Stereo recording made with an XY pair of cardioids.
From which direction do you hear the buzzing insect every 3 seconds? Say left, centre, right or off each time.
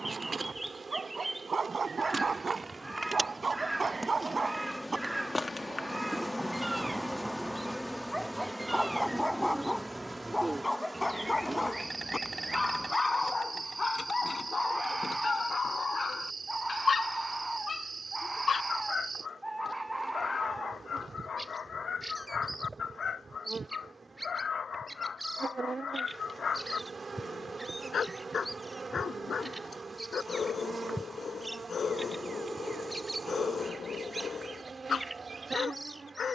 right, centre, centre, centre, right, right, right, right, right, right, right, right.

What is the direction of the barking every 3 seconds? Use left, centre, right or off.
right, right, centre, centre, left, left, left, left, left, left, left, left.